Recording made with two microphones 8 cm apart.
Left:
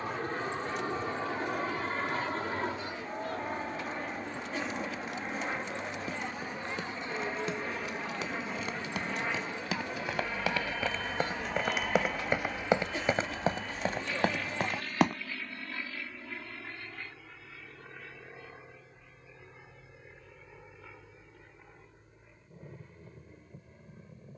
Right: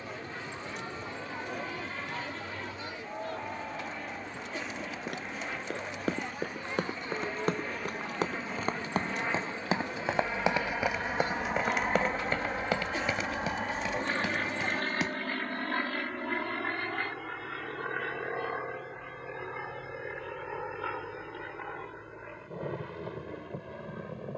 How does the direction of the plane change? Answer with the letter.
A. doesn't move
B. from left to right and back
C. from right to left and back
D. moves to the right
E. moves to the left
D.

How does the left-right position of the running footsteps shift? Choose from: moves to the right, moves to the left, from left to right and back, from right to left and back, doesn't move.
moves to the left.